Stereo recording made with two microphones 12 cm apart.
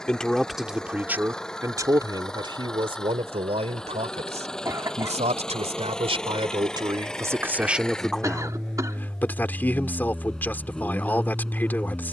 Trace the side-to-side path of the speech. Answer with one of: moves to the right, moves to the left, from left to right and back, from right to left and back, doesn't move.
from left to right and back.